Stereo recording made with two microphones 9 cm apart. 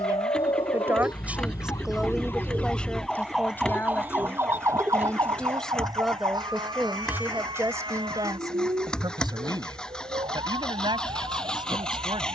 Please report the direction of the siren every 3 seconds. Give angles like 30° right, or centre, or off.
40° left, 30° right, 60° right, 60° right.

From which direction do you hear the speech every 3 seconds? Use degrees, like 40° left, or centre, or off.
10° right, 20° left, 30° right, 60° right.